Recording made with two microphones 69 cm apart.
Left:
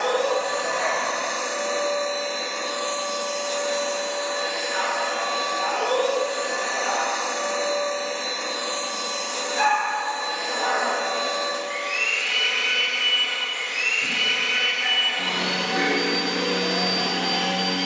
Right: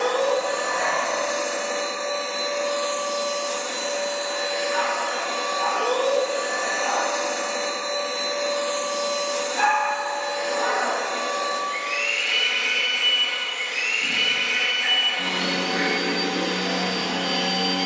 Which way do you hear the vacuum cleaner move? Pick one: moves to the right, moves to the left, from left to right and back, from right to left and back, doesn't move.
moves to the left.